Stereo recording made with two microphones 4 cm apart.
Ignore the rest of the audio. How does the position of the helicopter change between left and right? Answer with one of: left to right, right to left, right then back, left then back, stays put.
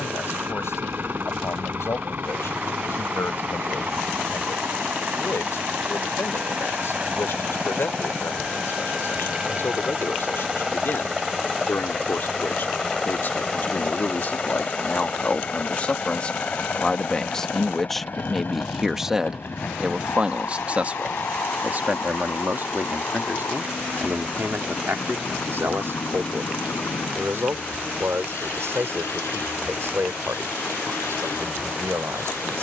right to left.